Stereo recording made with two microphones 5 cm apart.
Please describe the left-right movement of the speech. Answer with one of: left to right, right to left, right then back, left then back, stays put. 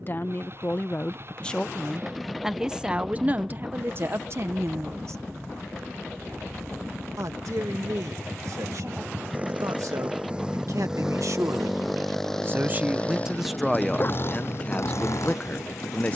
right then back.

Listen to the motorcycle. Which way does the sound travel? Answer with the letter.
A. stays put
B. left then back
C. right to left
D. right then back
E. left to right
C.